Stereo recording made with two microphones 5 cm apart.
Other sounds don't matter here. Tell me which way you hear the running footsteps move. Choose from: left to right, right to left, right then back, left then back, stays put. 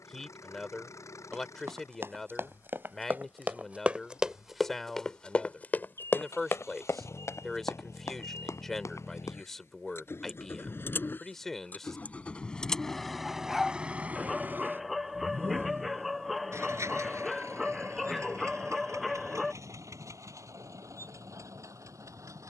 right to left.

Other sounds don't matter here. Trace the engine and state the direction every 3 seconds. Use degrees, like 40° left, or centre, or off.
80° left, 70° left, 70° left, 50° left, 10° right, 60° right, 80° right, 80° right.